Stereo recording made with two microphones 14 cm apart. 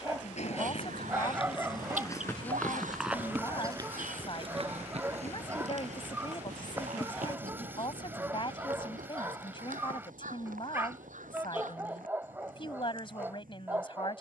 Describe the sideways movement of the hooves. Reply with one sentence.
In this clip you hear the hooves travel towards the right.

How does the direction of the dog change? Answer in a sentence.
You can hear the dog stay in one place.